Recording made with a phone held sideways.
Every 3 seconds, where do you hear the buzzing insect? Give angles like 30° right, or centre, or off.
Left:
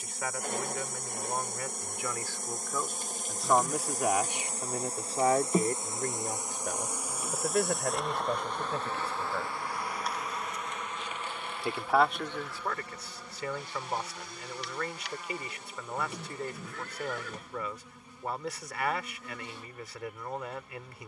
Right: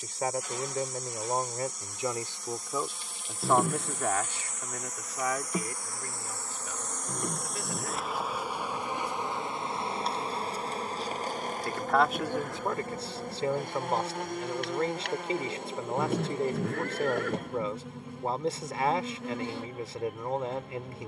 50° left, 30° left, centre, 30° right, 50° right, 60° right, 70° right.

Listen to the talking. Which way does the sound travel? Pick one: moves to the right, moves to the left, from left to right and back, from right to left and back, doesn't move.
from right to left and back.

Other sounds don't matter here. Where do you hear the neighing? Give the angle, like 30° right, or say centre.
60° right.